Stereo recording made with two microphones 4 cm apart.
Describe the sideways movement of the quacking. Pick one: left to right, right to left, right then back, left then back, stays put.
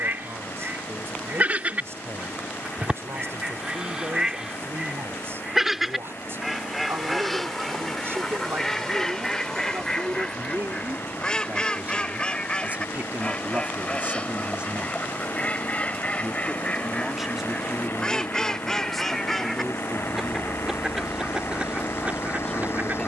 left then back.